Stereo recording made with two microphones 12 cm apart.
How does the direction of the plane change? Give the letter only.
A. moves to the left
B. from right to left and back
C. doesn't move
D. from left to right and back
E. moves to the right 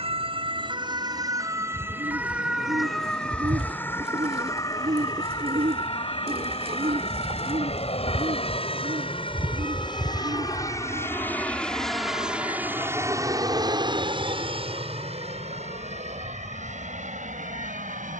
E.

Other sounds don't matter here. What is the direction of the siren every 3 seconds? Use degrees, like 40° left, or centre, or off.
30° right, 20° left, 40° left, 50° left, 60° left, 60° left.